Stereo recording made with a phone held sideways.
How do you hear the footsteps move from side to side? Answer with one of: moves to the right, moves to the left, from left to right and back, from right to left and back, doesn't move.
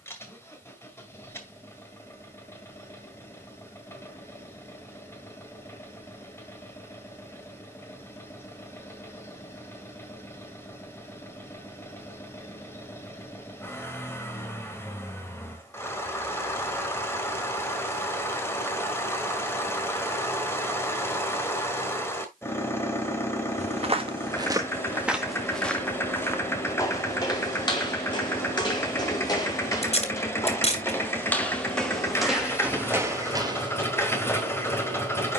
from right to left and back.